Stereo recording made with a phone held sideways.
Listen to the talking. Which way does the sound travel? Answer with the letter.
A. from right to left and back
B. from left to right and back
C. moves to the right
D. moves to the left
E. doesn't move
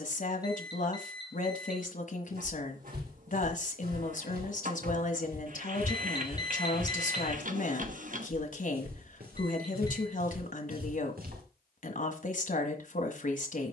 E.